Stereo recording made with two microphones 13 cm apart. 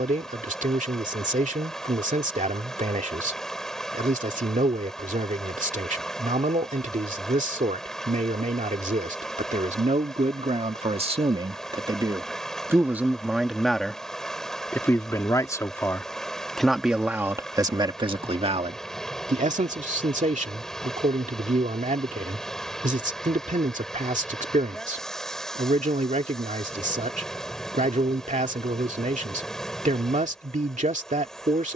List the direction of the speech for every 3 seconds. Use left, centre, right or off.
right, right, right, right, centre, centre, right, right, right, right, right.